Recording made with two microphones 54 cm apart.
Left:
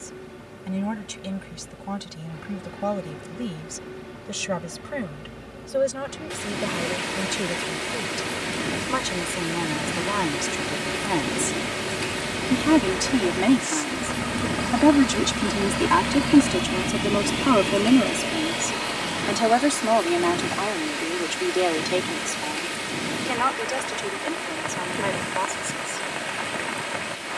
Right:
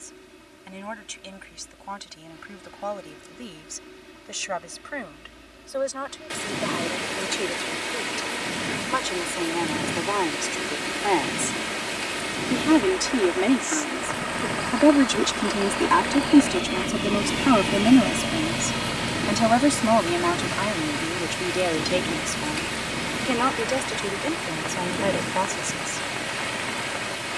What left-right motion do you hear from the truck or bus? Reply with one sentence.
In this clip you hear the truck or bus travel towards the right.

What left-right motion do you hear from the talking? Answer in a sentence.
You can hear the talking move from left to right.